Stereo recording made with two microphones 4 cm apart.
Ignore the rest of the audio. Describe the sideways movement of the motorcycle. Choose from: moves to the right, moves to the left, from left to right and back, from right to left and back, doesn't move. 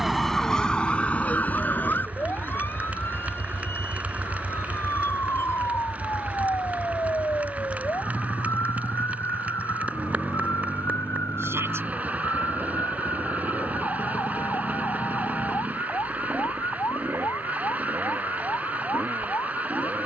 moves to the right.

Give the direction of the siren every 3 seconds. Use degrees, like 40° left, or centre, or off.
30° left, 60° left, 70° left, 70° left, 70° left, 70° left, 70° left.